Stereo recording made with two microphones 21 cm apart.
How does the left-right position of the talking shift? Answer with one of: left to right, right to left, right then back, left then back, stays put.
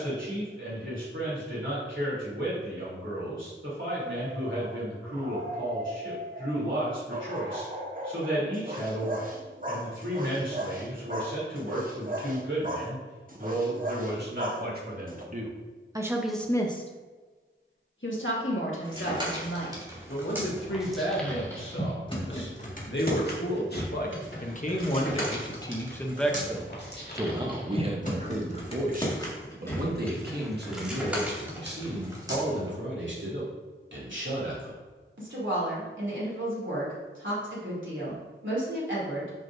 left then back.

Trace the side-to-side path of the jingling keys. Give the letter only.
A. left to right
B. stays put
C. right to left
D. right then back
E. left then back
E.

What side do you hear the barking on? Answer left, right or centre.
right.